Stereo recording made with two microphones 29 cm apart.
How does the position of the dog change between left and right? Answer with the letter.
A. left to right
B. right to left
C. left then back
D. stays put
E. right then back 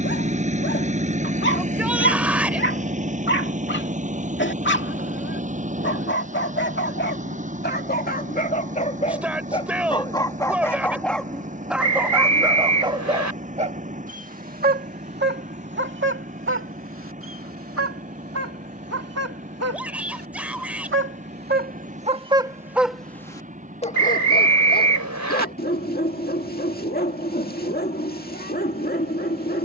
E.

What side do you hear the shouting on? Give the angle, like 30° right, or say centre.
centre.